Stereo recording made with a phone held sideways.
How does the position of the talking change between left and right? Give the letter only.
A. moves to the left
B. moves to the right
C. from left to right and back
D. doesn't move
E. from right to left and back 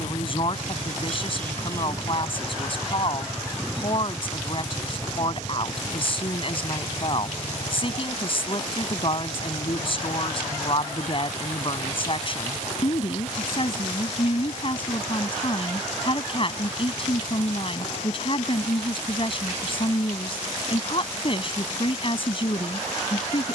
D.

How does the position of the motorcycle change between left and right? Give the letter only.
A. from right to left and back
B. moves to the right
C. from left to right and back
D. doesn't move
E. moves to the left
E.